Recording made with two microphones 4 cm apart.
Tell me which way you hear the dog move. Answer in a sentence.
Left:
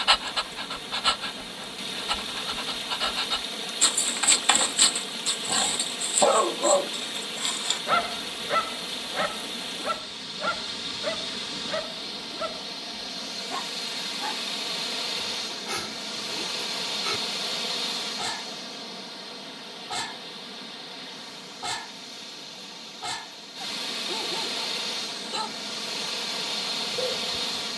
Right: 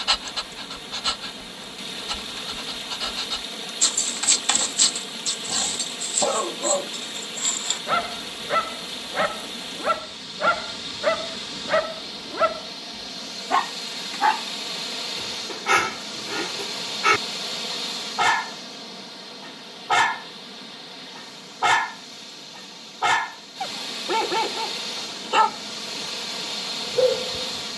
In this clip you hear the dog move from left to right.